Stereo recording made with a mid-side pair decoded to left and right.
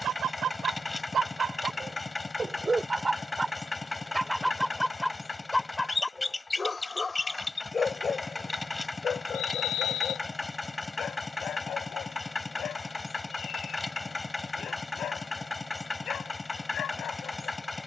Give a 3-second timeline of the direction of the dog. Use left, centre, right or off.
right, centre, left, left, left, left.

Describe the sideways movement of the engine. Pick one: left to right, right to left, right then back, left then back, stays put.
stays put.